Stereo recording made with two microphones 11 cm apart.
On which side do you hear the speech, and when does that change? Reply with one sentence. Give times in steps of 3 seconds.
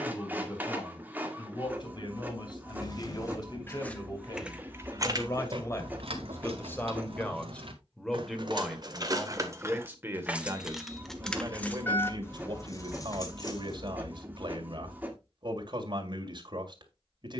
In this clip you hear the speech on the left from 0 s, in the centre from 6 s and on the right from 9 s.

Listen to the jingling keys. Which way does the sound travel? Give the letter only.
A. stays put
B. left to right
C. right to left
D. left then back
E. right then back
E.